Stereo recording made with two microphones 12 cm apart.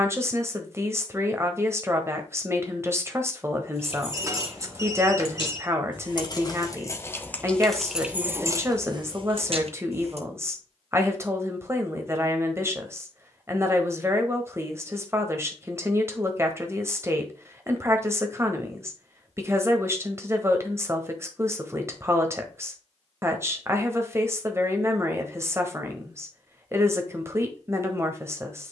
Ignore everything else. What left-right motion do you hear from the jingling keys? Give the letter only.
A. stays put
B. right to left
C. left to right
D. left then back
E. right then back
C.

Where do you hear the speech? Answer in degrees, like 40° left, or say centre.
20° right.